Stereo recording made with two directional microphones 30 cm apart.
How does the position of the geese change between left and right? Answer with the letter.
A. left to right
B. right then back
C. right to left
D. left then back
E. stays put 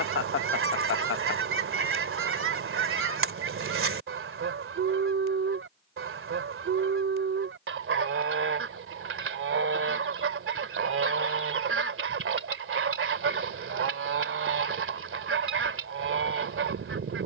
E.